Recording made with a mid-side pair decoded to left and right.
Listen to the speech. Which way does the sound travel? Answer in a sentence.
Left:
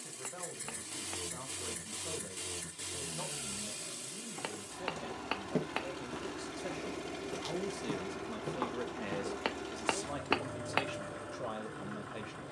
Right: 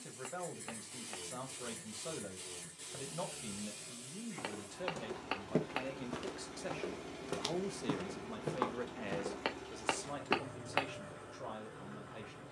You can hear the speech move to the left.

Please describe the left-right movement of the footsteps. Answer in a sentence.
You can hear the footsteps go right and come back.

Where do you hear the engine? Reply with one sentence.
In this clip you hear the engine on the left.